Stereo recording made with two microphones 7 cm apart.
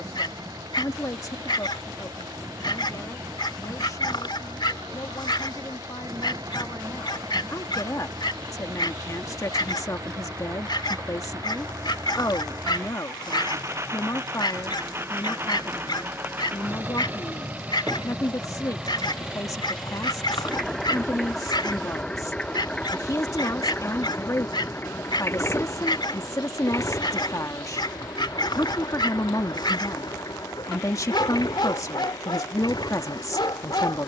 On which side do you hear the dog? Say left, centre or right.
left.